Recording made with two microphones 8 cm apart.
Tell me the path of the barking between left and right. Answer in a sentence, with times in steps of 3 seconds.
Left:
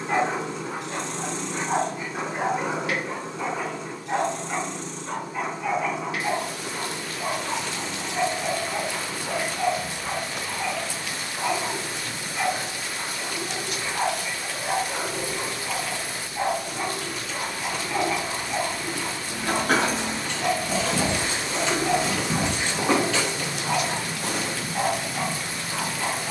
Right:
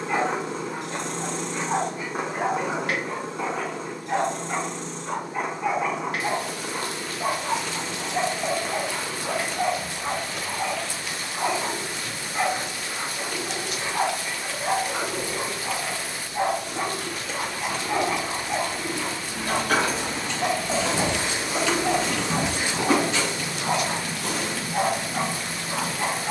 You can hear the barking on the left from 0 s, in the centre from 3 s and on the right from 6 s.